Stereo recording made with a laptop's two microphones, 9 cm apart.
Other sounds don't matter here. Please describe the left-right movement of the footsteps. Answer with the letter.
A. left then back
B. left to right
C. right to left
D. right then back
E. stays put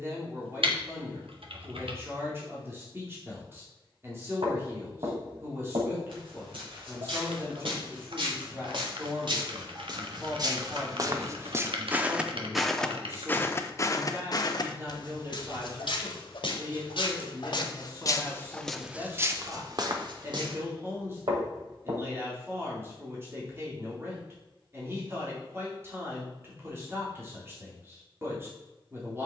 A.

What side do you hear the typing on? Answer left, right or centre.
right.